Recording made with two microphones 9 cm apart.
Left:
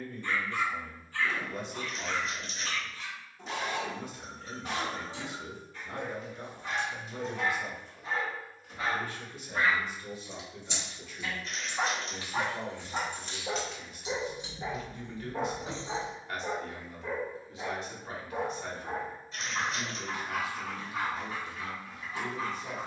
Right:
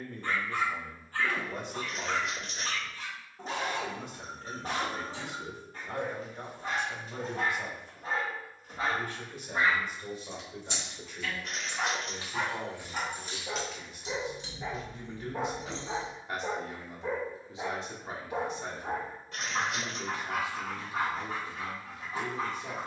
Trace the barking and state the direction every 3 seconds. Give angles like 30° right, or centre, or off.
40° right, 40° right, 40° right, centre, 20° left, 10° right, 40° right, 40° right.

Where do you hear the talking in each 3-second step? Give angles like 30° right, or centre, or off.
60° right, 60° right, 60° right, 50° right, 40° right, 30° right, 30° right, 30° right.